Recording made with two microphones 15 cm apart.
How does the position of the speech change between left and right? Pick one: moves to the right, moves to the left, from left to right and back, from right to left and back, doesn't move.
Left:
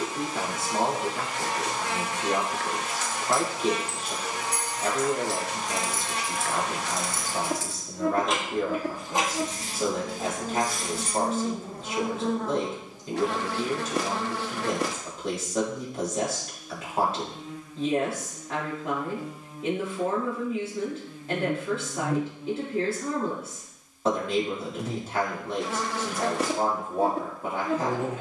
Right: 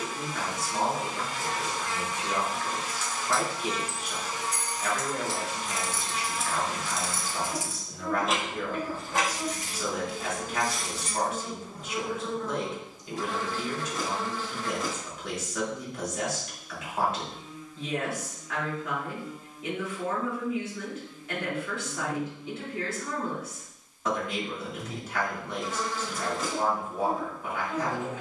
doesn't move.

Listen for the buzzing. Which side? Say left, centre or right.
left.